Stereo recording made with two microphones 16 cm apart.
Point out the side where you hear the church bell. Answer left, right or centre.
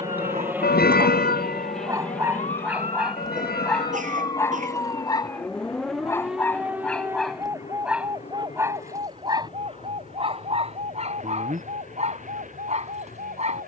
left.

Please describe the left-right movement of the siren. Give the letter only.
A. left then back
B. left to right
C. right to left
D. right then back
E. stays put
B.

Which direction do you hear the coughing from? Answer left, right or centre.
right.